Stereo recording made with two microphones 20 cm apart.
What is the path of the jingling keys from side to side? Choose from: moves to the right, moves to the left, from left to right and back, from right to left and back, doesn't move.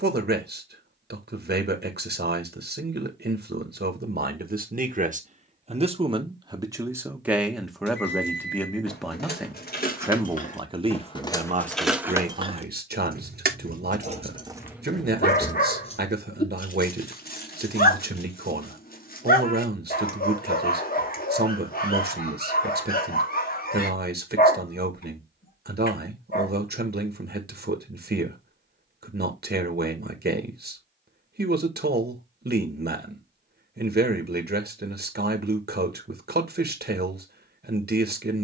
from left to right and back.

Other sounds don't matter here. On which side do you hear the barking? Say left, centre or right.
left.